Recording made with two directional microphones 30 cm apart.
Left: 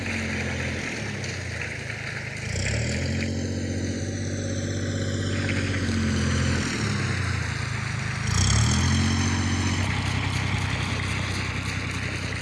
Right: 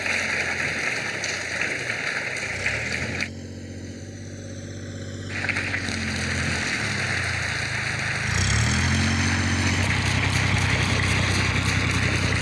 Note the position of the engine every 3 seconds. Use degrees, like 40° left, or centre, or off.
60° left, 50° left, 20° left, 20° right.